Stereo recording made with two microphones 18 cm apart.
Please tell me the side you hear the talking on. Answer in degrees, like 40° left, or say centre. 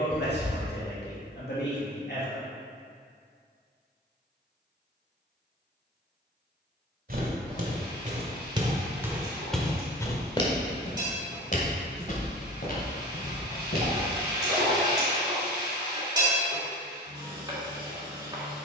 70° left.